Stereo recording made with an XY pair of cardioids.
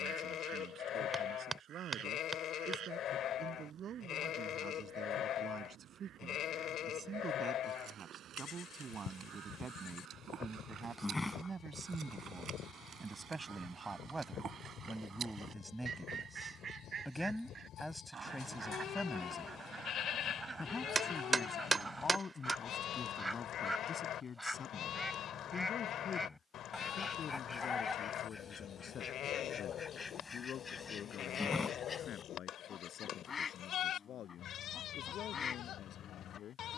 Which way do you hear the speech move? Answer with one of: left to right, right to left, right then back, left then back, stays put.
right to left.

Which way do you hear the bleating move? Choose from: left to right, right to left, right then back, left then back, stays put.
stays put.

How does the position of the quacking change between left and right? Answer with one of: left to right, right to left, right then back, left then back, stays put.
right to left.